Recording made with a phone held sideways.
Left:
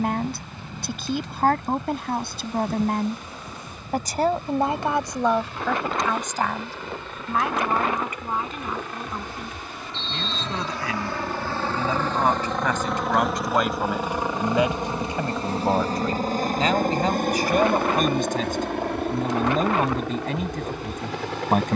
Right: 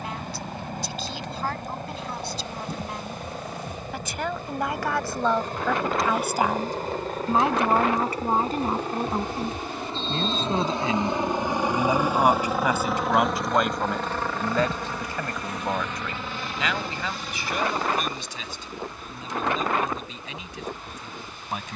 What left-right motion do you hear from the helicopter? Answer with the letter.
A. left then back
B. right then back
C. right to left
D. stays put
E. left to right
C.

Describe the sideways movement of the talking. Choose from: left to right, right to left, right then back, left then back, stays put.
right then back.